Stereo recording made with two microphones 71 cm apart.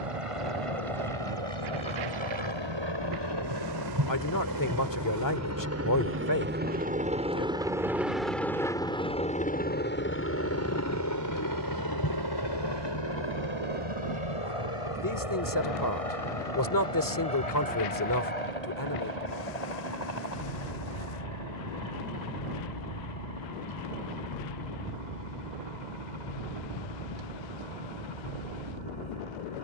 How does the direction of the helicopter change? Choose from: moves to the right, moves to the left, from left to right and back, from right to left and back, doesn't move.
moves to the left.